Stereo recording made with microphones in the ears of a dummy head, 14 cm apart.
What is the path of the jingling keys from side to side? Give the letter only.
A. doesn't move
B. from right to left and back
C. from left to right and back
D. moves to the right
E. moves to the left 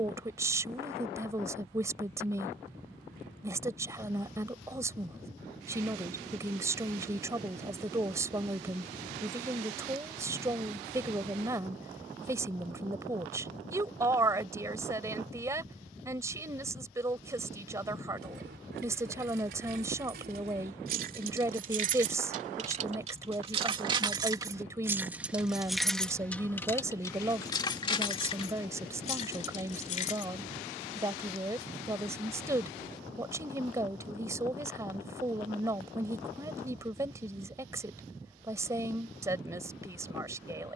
E.